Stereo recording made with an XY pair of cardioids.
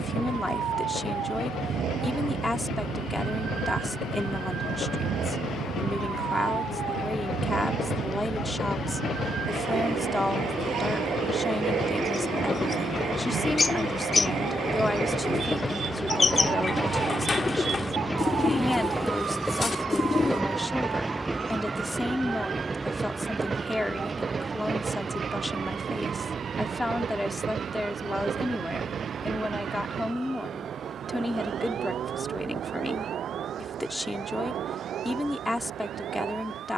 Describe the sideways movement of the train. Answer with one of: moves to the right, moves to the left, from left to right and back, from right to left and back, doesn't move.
moves to the right.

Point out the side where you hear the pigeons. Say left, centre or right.
left.